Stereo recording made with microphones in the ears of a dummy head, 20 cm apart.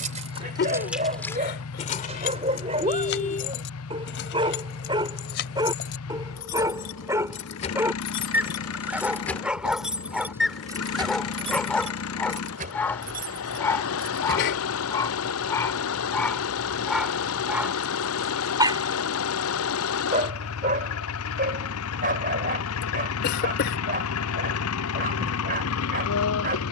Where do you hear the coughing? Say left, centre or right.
left.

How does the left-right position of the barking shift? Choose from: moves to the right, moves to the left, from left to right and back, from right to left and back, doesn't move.
from right to left and back.